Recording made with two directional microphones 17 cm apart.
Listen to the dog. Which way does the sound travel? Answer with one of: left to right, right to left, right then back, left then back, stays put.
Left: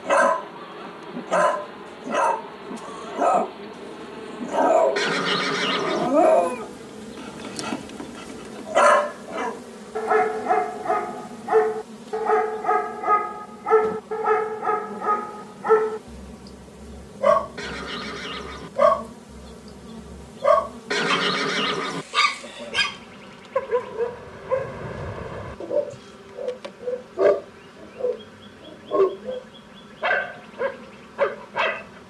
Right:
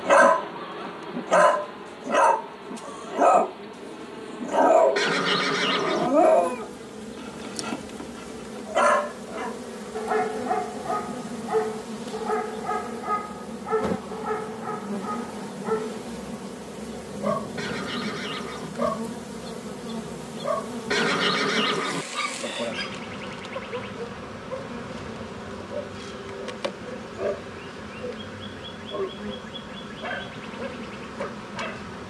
right to left.